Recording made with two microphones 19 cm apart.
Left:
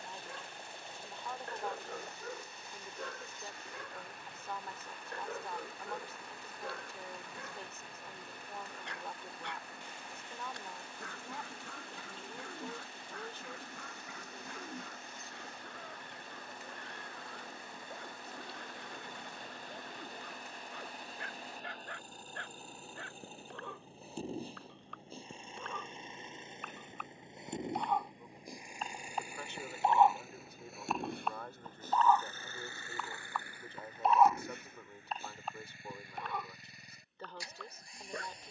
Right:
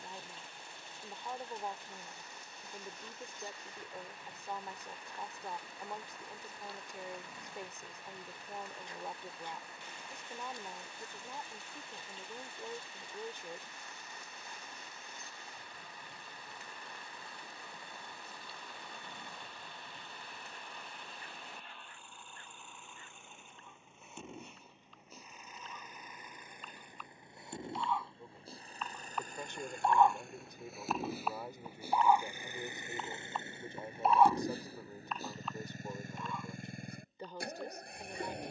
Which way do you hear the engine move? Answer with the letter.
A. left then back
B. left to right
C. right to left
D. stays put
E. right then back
B.